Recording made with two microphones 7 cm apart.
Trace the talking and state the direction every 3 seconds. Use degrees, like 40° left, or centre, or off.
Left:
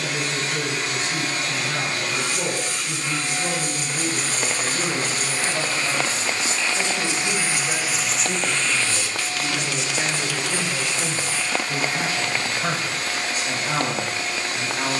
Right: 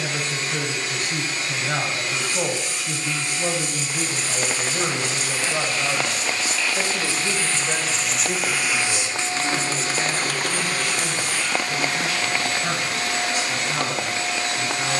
50° right, 50° right, 20° right, 20° left, 40° left.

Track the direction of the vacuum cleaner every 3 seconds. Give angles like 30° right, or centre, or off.
60° left, 40° left, 10° left, 50° right, 80° right.